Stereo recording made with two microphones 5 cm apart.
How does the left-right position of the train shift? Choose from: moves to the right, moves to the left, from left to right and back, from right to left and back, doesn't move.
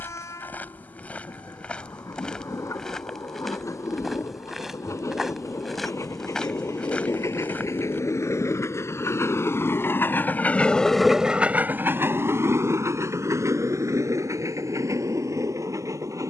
moves to the right.